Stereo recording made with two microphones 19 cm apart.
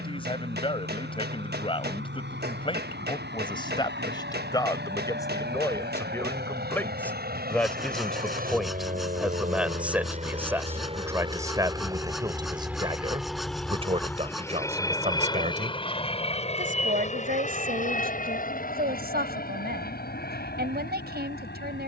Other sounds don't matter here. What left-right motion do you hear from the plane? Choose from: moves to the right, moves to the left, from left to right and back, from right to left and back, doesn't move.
moves to the left.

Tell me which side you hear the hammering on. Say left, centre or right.
right.